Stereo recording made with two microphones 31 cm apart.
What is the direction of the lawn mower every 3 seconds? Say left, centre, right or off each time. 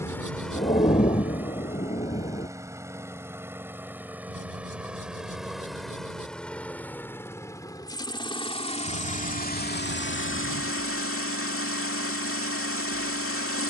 centre, centre, centre, left, left.